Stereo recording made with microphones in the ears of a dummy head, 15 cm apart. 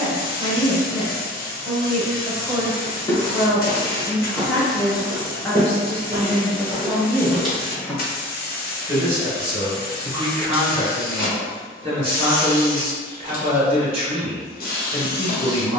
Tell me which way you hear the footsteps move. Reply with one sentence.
In this clip you hear the footsteps go right and come back.